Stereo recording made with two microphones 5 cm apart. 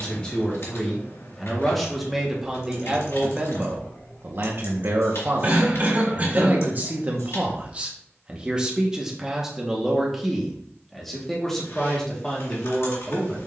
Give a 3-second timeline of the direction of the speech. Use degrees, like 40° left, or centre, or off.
centre, 40° right, 30° right, centre, 10° left.